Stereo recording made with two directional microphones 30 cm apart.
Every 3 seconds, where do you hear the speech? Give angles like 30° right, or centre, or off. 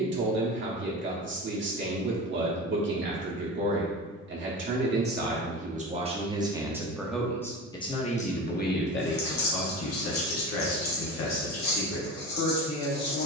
40° right, 30° right, 10° left, 50° left, 60° left.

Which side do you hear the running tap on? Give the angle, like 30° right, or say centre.
60° left.